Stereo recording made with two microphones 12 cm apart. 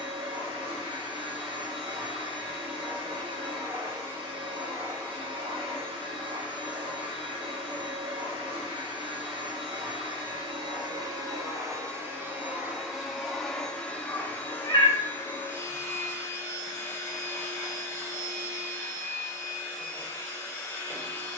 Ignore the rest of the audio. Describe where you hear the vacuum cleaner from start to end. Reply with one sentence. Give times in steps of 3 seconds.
In this clip you hear the vacuum cleaner on the right from 0 s, in the centre from 12 s and on the left from 15 s.